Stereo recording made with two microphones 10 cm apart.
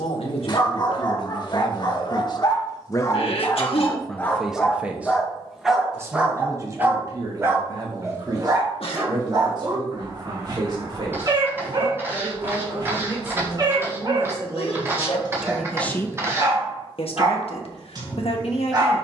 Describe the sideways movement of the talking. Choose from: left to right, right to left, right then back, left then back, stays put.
right then back.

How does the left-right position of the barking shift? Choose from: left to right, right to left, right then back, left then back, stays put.
left to right.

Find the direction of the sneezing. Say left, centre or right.
left.